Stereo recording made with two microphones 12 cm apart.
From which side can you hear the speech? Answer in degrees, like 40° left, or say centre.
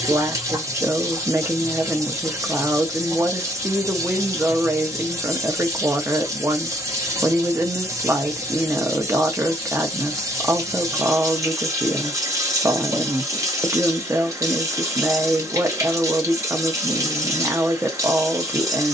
20° right.